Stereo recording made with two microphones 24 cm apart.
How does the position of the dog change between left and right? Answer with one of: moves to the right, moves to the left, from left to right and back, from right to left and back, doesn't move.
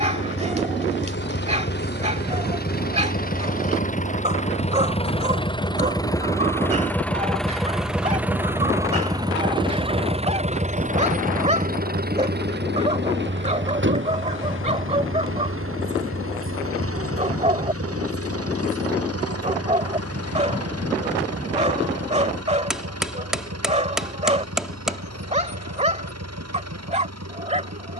doesn't move.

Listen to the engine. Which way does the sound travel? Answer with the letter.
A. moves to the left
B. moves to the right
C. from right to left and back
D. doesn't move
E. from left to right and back
B.